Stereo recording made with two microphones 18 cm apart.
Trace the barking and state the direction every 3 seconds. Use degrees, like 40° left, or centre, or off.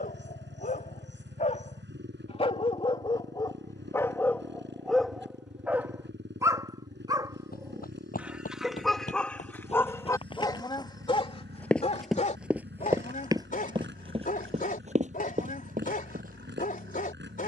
40° left, 10° left, 10° right, 20° left, 50° left, 50° left.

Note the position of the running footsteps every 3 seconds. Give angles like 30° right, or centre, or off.
off, off, 50° left, 30° left, 20° right, 50° right.